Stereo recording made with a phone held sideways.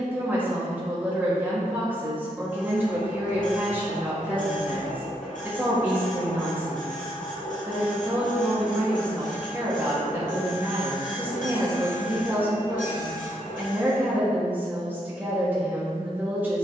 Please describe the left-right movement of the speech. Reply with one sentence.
You can hear the speech stay in one place.